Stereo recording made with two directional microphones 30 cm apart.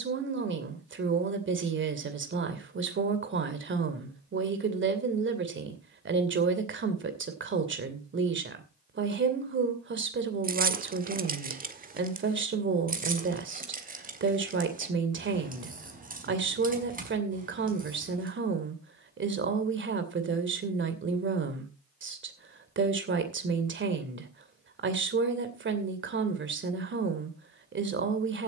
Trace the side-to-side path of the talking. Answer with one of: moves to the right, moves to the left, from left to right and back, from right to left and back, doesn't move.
doesn't move.